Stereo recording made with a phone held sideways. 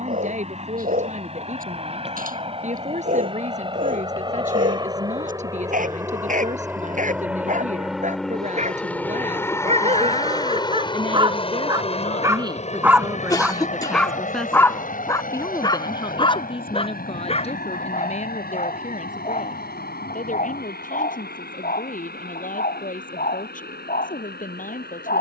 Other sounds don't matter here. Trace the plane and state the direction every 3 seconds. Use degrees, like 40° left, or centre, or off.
50° right, 30° right, 10° right, 30° left, 50° left, 60° left, 70° left, 80° left, 80° left.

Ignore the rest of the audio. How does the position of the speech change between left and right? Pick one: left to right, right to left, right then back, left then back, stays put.
right to left.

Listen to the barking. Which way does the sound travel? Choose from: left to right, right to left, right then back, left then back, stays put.
right to left.